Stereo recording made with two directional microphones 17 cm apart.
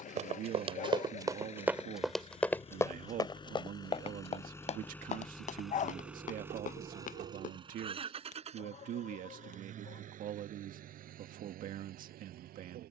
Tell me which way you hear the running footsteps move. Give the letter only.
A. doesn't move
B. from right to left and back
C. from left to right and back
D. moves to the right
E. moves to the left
E.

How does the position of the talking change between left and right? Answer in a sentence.
You can hear the talking stay in one place.